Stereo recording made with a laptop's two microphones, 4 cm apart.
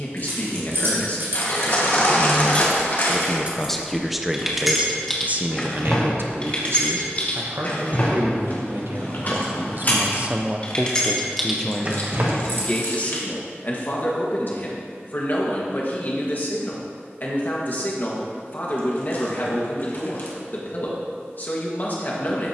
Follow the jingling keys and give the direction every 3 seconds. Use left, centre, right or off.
right, centre, left, left, right, off, off, off.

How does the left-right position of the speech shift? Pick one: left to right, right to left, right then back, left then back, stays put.
right then back.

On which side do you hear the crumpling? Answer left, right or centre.
left.